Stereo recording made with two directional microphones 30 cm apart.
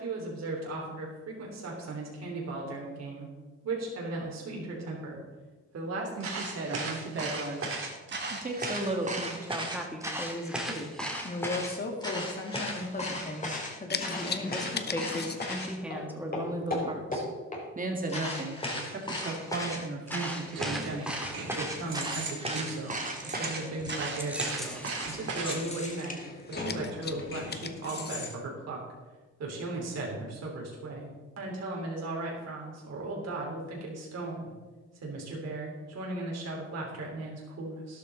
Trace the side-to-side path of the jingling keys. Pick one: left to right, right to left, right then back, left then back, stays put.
right to left.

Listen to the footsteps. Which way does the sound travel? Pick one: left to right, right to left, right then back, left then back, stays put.
left then back.